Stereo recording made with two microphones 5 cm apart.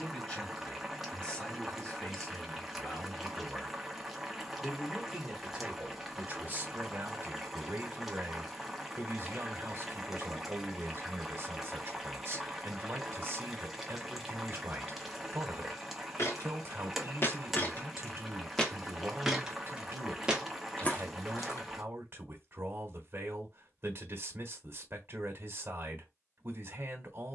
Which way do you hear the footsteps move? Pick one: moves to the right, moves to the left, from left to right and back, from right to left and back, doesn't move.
from left to right and back.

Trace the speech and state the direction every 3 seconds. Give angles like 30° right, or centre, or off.
20° left, centre, 40° right, 40° right, 40° right, 40° right, 40° right, 40° right, 40° right.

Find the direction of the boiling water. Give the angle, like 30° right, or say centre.
centre.